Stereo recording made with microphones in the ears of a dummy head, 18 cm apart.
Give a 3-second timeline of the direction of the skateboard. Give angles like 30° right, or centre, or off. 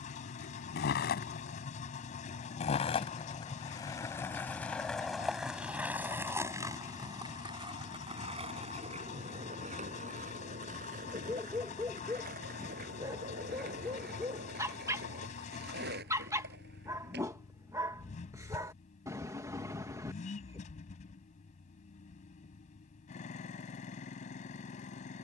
40° left, 10° left, 20° right, 40° right, 50° right, 50° right, off, off, off.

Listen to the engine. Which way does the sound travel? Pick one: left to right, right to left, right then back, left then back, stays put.
stays put.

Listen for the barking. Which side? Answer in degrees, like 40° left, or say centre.
20° right.